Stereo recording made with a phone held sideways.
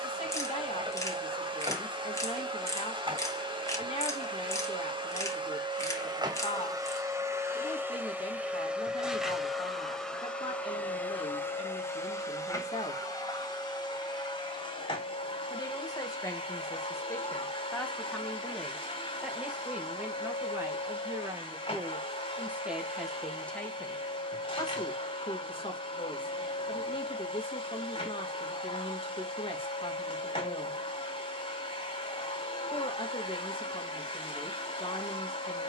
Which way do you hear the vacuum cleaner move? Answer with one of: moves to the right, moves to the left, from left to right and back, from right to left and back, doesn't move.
moves to the left.